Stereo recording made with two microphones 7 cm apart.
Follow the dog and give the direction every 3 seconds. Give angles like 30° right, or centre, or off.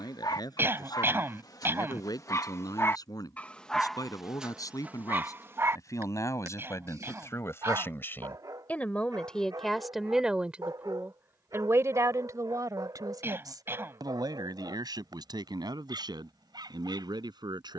50° left, 10° right, 60° right, 70° right, 70° right, 70° right.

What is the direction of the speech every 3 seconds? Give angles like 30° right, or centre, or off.
60° left, 50° left, 40° left, 10° right, 60° right, 80° right.